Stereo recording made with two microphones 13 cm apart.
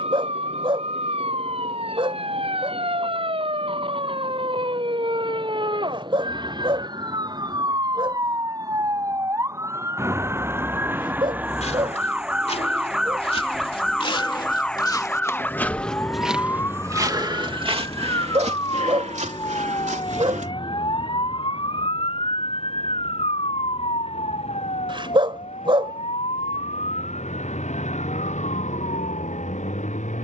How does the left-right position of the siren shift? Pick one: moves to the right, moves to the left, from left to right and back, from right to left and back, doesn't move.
moves to the left.